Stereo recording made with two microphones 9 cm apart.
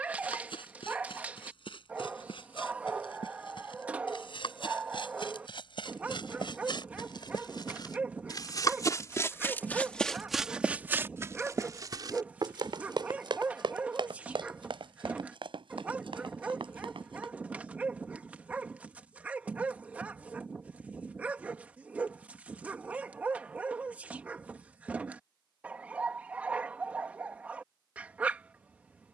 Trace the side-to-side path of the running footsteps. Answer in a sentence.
You can hear the running footsteps go from the left side to the right.